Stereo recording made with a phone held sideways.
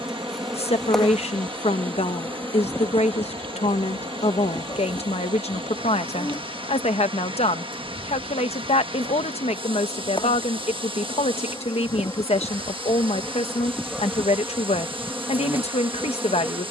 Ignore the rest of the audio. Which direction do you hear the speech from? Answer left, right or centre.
left.